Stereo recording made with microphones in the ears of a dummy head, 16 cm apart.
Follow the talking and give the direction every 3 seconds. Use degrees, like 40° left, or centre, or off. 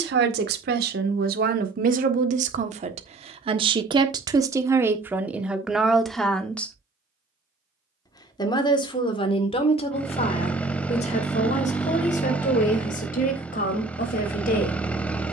50° right, 20° right, 10° left, 40° left, 50° left.